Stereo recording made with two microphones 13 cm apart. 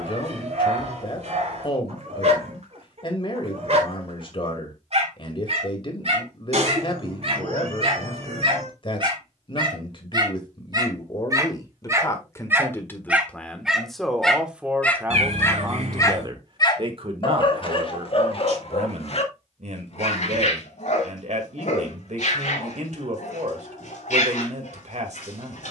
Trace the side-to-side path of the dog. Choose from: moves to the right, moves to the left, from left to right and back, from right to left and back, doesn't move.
moves to the left.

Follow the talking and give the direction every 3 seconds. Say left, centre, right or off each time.
left, left, left, left, centre, right, right, right, right.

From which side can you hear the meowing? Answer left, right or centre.
right.